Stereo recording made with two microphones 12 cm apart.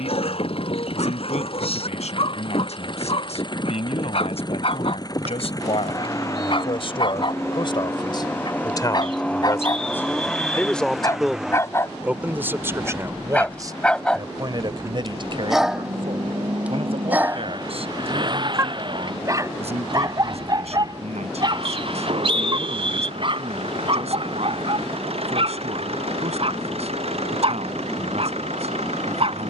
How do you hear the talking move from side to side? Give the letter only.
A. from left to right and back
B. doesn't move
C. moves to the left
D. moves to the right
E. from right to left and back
D.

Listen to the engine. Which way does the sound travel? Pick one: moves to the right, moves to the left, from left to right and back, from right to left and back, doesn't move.
moves to the right.